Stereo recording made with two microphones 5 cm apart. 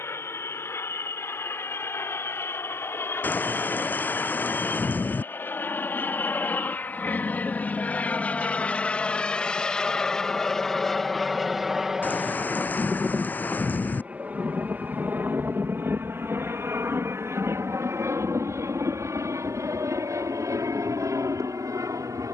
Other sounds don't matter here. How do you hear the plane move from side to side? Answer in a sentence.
In this clip you hear the plane travel towards the right.